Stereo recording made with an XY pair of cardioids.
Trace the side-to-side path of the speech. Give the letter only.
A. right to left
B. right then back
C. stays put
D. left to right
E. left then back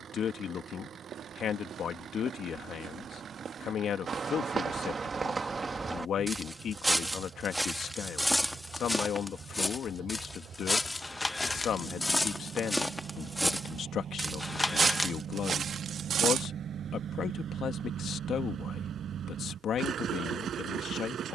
C.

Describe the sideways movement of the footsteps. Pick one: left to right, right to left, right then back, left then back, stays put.
left then back.